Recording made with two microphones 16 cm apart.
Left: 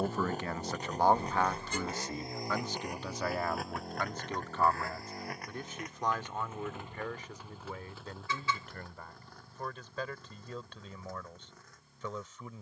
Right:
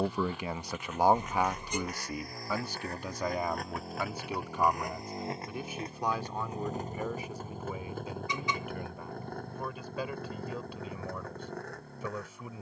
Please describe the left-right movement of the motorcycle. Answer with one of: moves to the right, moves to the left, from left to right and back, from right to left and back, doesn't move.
moves to the right.